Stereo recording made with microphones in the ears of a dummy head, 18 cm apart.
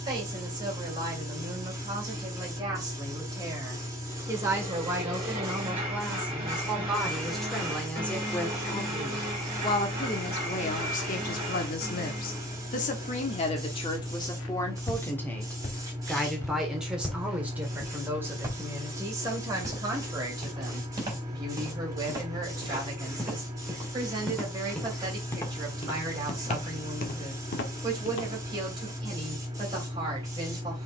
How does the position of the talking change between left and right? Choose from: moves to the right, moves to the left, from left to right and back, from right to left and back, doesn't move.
from right to left and back.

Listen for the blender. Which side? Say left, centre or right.
right.